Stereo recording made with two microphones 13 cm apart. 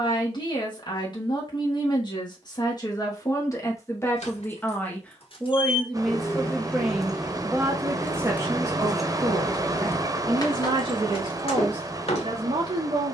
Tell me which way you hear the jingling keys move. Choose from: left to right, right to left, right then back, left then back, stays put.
right then back.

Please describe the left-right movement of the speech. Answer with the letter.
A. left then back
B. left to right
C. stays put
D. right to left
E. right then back
B.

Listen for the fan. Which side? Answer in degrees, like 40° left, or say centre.
30° right.